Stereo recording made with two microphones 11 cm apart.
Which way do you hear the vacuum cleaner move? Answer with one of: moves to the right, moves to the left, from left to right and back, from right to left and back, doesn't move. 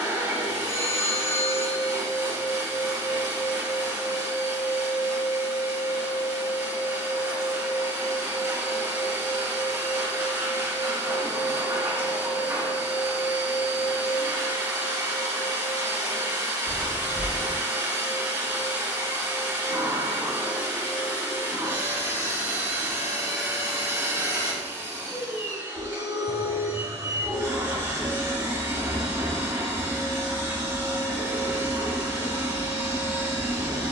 doesn't move.